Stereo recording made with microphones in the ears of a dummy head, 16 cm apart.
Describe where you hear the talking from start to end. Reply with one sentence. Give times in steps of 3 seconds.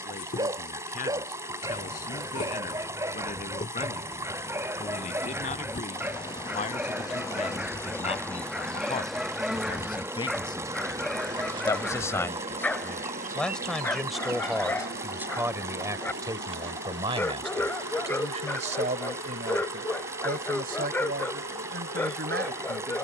In this clip you hear the talking on the left from 0 s, in the centre from 12 s and on the right from 15 s.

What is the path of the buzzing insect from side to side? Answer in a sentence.
You can hear the buzzing insect move from left to right.